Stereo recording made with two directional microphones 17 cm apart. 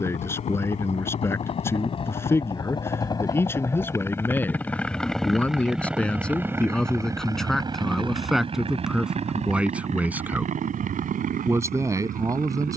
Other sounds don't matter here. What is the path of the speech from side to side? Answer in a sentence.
You can hear the speech go from the left side to the right.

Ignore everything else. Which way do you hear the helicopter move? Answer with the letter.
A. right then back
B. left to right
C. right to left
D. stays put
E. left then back
B.